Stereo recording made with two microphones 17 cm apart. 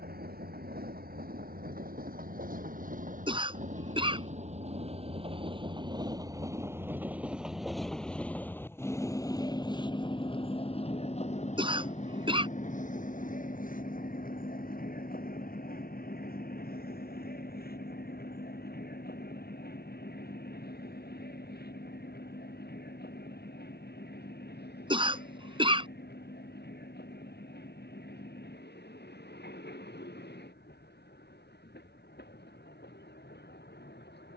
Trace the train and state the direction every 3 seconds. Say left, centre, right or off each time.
right, right, centre, left, left, left, left, left, left, left, left, left.